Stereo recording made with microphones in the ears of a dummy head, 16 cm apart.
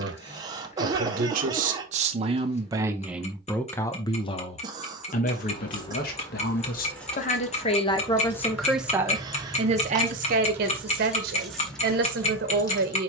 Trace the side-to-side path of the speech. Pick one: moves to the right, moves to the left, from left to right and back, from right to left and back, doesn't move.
from right to left and back.